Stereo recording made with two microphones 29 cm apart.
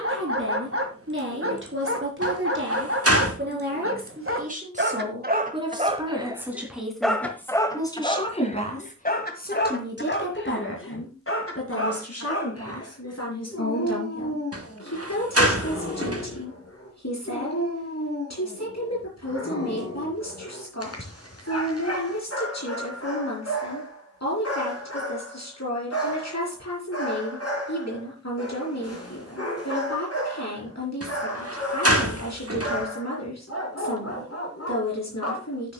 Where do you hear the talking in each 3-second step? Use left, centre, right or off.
right, right, centre, left, left, left, left, left, left, left, left, left.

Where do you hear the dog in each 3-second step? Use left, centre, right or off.
right, right, centre, left, left, left, left, left, left, left, left, left.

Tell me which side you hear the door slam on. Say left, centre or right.
right.